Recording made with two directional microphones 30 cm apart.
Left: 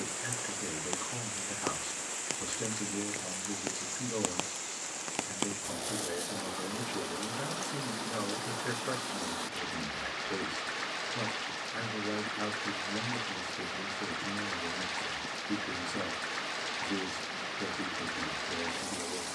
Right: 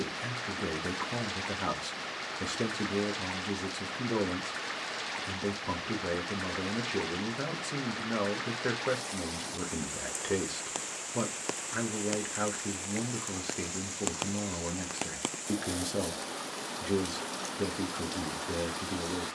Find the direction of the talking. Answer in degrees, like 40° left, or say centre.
60° right.